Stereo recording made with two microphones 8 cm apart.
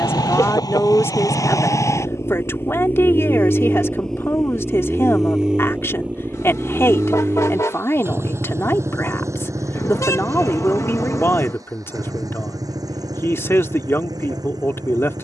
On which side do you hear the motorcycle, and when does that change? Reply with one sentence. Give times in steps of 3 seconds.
You can hear the motorcycle on the left from 0 s, in the centre from 3 s and on the right from 6 s.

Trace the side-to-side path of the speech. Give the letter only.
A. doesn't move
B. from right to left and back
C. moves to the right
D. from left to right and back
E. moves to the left
A.